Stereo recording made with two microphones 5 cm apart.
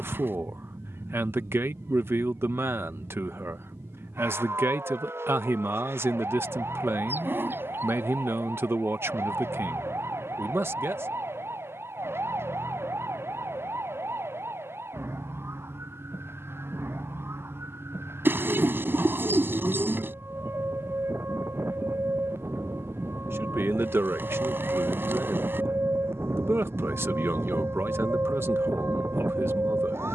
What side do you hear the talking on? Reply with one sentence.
You can hear the talking on the right.